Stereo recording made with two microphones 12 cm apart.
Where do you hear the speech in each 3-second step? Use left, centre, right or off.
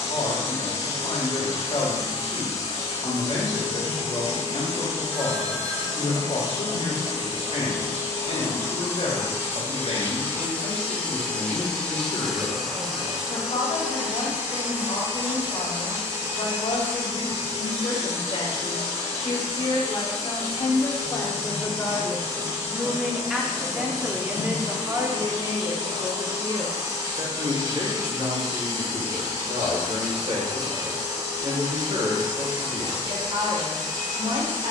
left, left, left, left, left, left, left, centre, right, right, right, right.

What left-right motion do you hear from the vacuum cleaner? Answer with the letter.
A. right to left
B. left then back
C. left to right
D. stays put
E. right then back
C.